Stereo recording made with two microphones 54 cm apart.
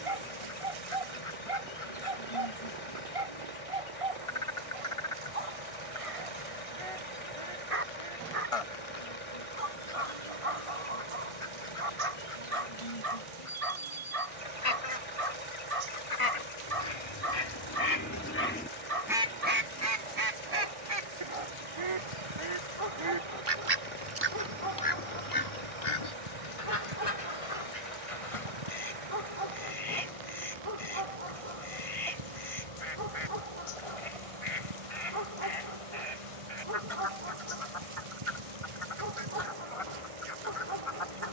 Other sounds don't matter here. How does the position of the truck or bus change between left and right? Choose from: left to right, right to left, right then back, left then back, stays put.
stays put.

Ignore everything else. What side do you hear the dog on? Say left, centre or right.
right.